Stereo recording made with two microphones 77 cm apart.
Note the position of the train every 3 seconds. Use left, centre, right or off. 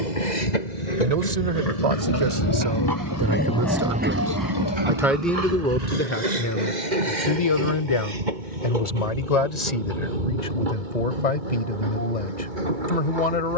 left, right, right, right, right.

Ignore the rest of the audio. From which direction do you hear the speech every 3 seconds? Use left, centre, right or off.
right, centre, left, left, left.